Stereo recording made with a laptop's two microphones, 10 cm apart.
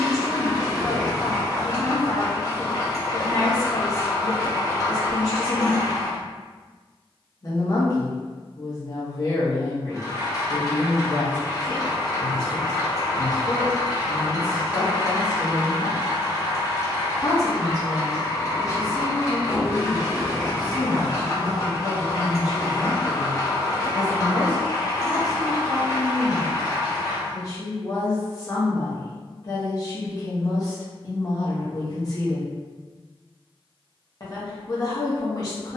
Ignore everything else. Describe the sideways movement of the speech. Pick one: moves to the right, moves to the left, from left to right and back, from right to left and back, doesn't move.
doesn't move.